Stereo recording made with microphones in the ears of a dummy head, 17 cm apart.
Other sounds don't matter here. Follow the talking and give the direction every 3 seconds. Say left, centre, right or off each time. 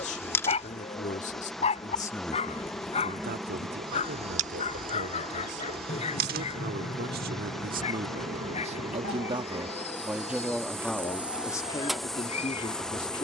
left, right, right, centre, left.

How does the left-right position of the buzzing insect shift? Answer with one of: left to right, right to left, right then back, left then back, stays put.
right then back.